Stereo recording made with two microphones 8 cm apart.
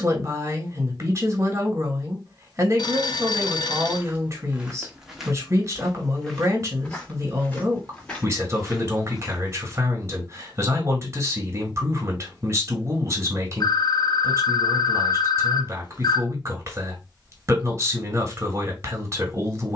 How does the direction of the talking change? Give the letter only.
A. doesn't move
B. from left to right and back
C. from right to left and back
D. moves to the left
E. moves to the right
A.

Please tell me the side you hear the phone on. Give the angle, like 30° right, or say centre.
70° left.